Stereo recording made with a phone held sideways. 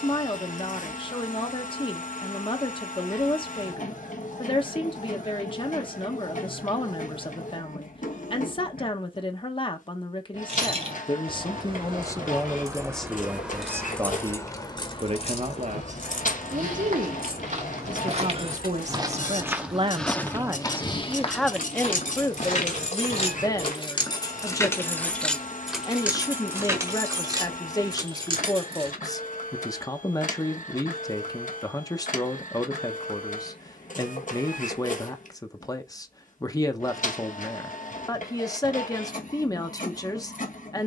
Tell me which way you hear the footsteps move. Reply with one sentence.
In this clip you hear the footsteps move from right to left.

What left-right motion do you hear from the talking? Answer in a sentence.
In this clip you hear the talking move from left to right and back again.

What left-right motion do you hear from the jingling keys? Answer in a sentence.
In this clip you hear the jingling keys move from right to left and back again.